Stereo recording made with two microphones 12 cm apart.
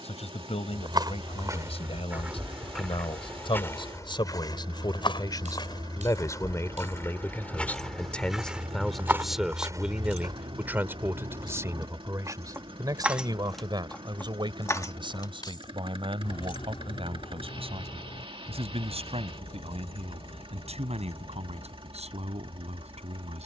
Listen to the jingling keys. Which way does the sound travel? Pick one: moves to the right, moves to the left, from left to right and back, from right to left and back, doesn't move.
moves to the left.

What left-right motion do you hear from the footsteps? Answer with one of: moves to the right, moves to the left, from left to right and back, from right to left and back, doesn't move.
from right to left and back.